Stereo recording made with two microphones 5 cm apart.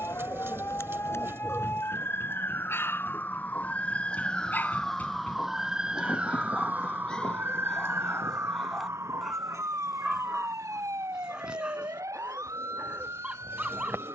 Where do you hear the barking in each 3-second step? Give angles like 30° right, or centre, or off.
60° left, 40° left, 20° left, 10° right, 20° right.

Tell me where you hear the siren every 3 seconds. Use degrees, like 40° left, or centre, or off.
50° left, 20° left, 40° right, 70° right, 80° right.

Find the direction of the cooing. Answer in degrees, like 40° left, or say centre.
50° right.